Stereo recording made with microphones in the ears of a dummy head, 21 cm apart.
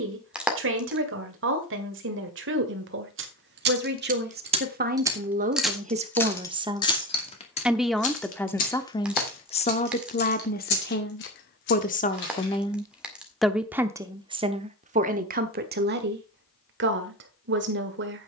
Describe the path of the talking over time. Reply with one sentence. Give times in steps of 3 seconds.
In this clip you hear the talking on the right from 0 s, in the centre from 6 s, on the left from 9 s, in the centre from 12 s and on the right from 15 s.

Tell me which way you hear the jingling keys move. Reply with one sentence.
In this clip you hear the jingling keys move from right to left.